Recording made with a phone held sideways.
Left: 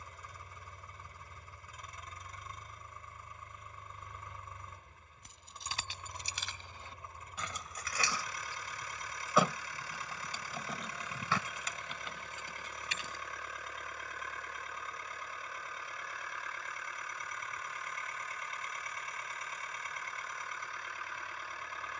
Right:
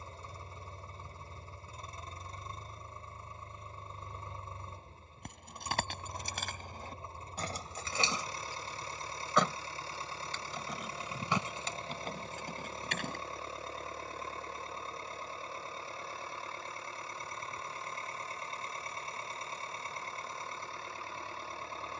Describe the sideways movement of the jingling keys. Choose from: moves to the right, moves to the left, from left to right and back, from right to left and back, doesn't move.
from right to left and back.